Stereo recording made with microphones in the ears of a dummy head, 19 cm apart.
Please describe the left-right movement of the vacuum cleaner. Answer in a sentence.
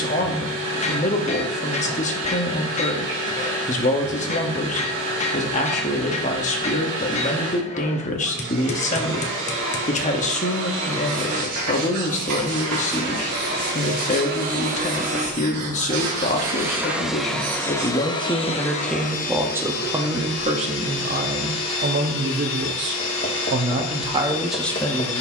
You can hear the vacuum cleaner move from right to left.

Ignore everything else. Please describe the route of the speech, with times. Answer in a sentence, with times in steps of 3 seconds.
You can hear the speech on the left from 0 s, in the centre from 18 s, on the right from 21 s and in the centre from 24 s.